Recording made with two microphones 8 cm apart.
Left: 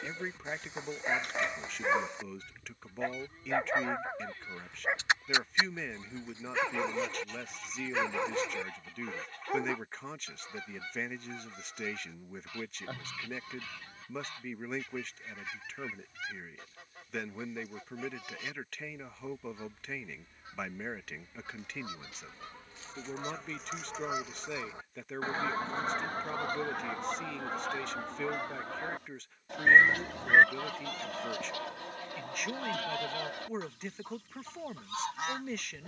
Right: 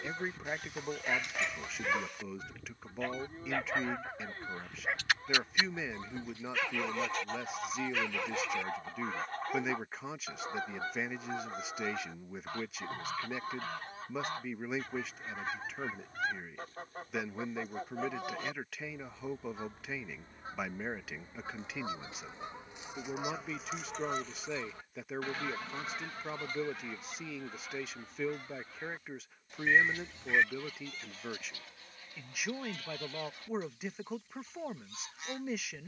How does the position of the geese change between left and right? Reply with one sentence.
You can hear the geese go from the right side to the left.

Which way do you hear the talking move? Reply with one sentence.
You can hear the talking stay in one place.